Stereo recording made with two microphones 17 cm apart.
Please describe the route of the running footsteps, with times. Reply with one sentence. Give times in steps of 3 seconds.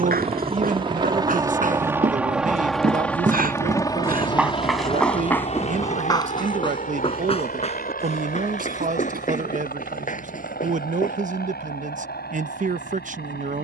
In this clip you hear the running footsteps on the right from 0 s, in the centre from 3 s, on the left from 6 s and not at all from 12 s.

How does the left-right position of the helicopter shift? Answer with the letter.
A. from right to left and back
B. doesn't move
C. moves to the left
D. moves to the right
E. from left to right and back
C.